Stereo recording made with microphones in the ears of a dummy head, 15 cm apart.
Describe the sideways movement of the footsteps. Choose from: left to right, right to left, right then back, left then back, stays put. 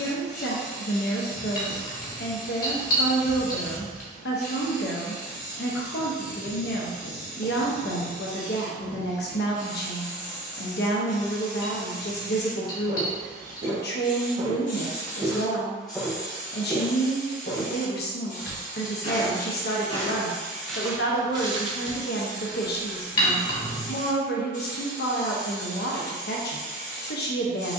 left then back.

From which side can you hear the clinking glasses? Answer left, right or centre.
left.